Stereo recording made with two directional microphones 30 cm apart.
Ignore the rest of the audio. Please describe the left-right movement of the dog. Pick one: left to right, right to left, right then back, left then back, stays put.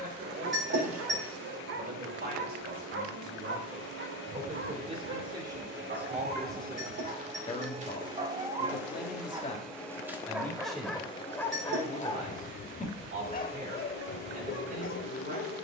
right to left.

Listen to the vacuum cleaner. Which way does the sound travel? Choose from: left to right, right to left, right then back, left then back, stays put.
right to left.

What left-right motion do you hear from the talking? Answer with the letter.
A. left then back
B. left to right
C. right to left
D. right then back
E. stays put
A.